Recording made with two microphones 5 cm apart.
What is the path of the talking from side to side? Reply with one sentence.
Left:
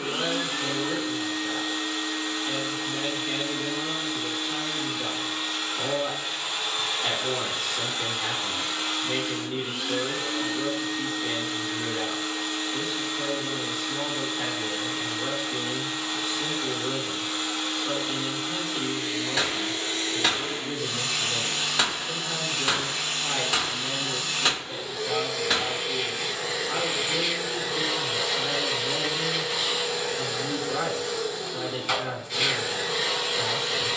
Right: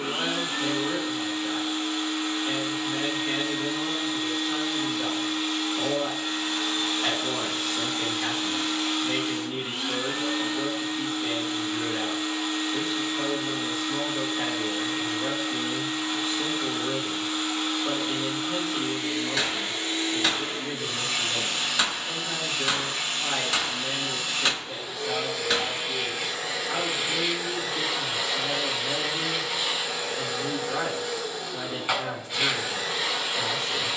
In this clip you hear the talking stay put.